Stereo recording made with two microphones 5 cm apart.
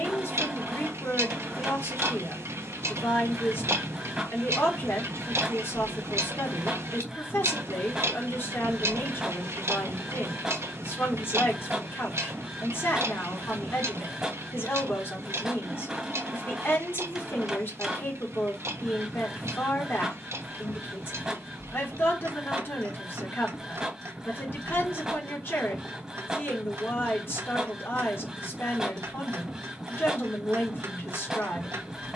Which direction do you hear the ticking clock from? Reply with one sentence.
You can hear the ticking clock on the right.